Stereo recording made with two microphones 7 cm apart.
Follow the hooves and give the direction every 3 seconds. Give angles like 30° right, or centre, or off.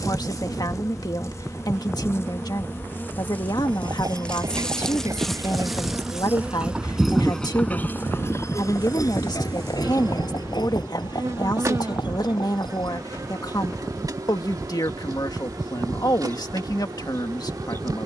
off, 50° right, 10° left, 70° left, 80° left, off.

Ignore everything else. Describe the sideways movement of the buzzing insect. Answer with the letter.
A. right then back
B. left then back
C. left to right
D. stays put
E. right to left
C.